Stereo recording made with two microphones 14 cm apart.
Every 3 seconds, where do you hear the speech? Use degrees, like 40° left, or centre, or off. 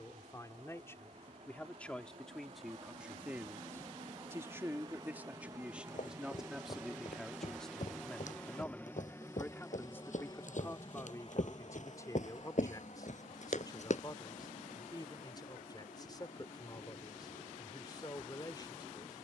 10° left, 10° right, centre, 20° left, 30° left, 30° left, 30° left.